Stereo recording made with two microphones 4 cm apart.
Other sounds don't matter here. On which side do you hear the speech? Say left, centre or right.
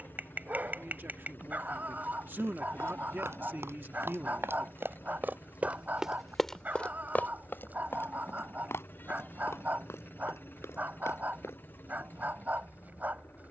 right.